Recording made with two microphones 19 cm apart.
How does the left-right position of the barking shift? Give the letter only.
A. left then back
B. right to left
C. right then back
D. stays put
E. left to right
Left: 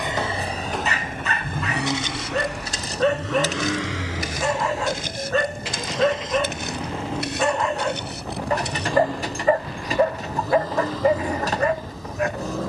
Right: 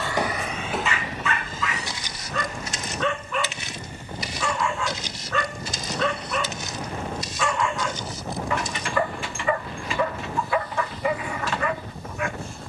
D.